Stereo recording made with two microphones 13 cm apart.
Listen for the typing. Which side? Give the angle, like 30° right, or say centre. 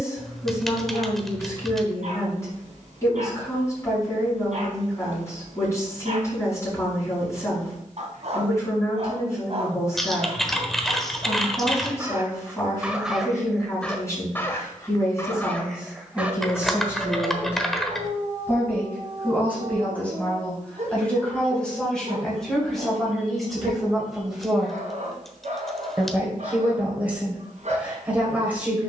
centre.